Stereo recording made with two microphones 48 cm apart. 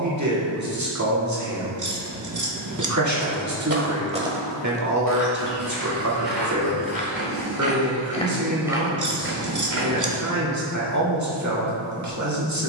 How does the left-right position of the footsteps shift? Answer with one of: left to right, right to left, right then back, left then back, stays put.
left then back.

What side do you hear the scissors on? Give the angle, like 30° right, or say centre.
40° right.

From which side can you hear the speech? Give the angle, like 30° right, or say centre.
40° right.